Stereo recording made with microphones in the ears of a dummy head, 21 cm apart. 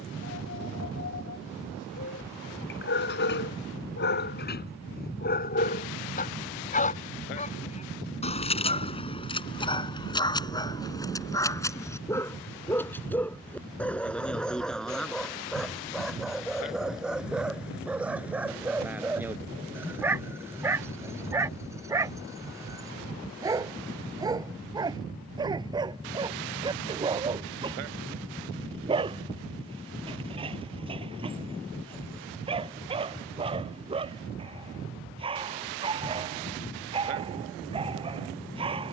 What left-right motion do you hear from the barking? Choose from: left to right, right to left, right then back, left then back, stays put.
left to right.